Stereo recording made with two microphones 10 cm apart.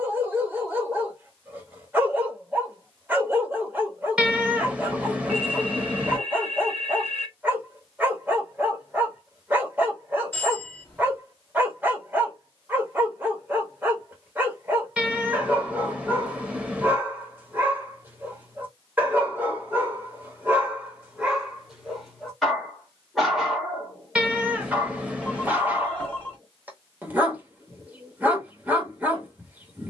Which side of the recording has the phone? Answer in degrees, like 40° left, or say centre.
20° left.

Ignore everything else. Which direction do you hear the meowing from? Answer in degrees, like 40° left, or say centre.
10° right.